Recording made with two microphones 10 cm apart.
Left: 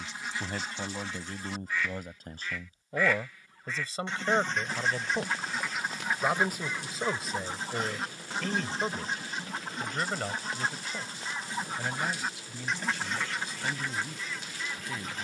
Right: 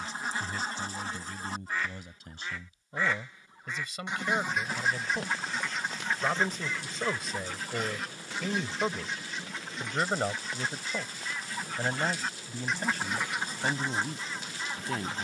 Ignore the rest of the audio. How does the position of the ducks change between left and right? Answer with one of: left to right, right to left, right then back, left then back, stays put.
left then back.